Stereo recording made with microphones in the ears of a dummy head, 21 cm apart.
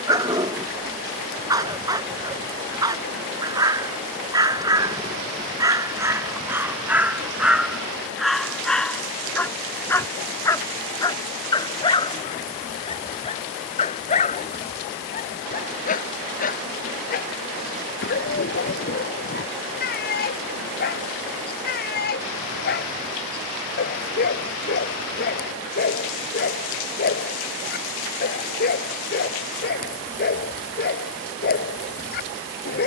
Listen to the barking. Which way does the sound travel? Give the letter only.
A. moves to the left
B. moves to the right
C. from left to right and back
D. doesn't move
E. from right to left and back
A.